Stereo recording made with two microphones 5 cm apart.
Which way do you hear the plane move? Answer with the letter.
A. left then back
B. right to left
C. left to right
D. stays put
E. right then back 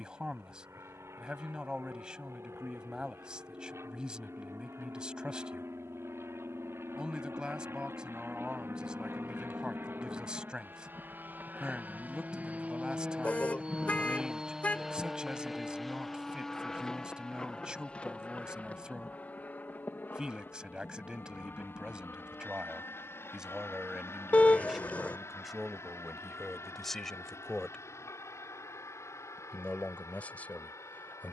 B.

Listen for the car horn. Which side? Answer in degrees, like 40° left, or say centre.
30° left.